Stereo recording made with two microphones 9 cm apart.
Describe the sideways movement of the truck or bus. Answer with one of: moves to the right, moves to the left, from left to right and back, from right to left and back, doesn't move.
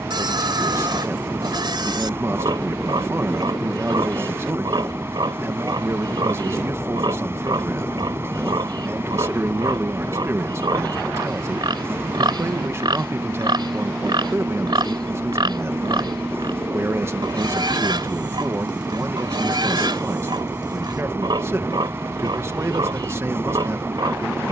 doesn't move.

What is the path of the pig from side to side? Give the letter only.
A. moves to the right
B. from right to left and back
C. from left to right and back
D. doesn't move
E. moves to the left
D.